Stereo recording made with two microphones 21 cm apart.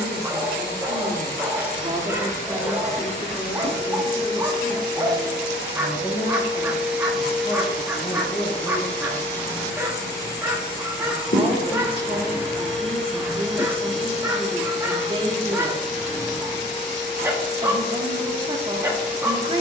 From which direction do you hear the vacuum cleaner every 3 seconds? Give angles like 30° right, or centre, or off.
50° right, 20° right, centre, 20° left, 30° left, 30° left, 30° left.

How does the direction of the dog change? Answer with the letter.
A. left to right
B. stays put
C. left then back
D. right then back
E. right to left
B.